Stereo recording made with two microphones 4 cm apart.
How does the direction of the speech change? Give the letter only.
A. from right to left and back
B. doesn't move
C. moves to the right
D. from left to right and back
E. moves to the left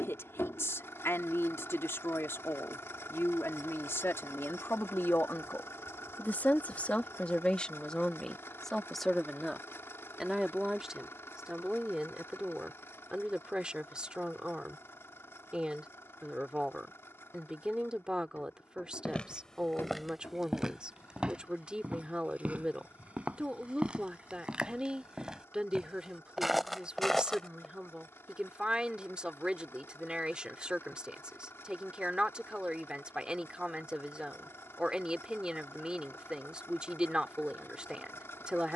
C.